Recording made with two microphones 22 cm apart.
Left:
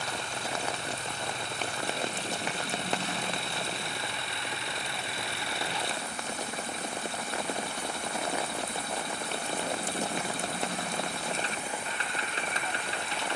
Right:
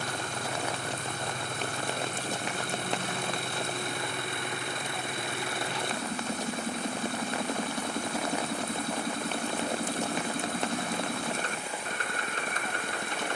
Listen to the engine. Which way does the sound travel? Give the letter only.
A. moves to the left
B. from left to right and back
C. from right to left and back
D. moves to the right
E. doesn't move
E.